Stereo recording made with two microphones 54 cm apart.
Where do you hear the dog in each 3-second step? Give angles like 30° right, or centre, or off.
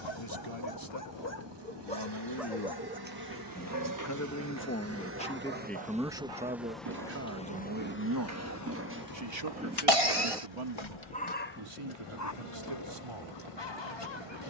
20° left, 40° right, 40° right, centre, 50° left.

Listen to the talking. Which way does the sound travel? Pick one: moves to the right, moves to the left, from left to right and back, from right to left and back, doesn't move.
moves to the right.